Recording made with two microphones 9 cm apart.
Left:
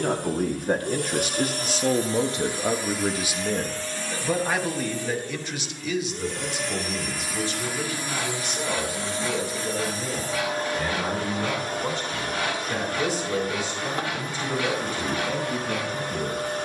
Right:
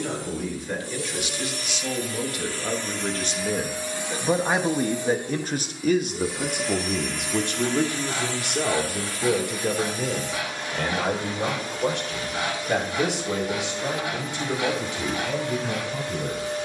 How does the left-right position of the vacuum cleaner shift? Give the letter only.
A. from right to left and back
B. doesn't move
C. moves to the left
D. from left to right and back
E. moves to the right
D.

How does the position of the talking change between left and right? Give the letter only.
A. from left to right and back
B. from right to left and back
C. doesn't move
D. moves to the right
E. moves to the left
D.